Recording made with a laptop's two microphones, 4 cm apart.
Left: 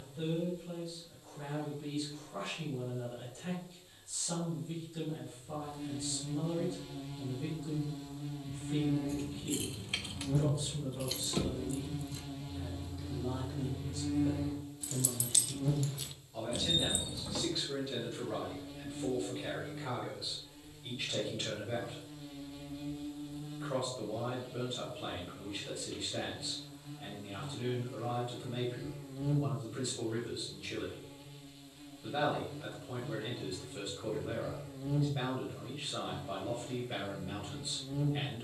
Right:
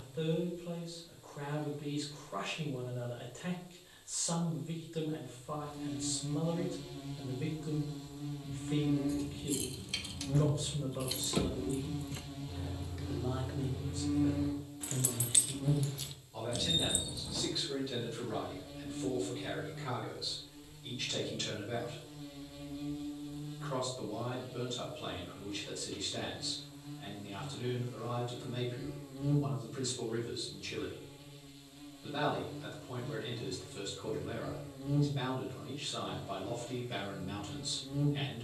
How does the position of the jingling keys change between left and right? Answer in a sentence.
You can hear the jingling keys go right and come back.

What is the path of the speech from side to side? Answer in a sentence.
You can hear the speech go from the right side to the left.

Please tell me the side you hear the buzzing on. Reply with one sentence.
In this clip you hear the buzzing in the centre.